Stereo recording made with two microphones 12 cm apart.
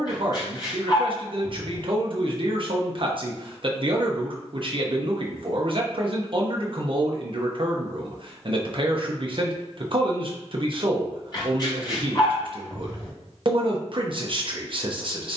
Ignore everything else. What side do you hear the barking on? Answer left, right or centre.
left.